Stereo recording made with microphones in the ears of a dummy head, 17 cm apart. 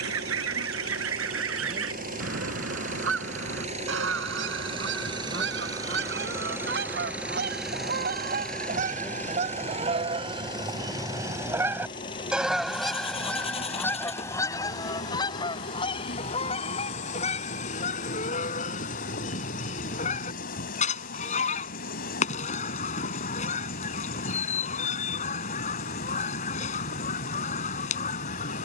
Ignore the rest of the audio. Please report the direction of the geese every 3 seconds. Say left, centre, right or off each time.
right, right, right, right, centre, left, left, left, left, left.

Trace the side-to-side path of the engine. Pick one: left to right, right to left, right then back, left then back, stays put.
right to left.